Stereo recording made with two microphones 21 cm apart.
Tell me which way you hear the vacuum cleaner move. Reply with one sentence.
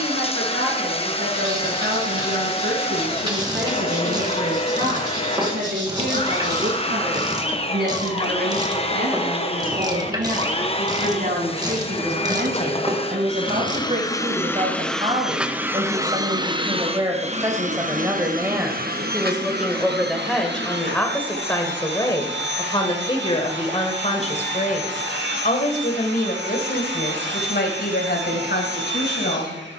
You can hear the vacuum cleaner go from the left side to the right.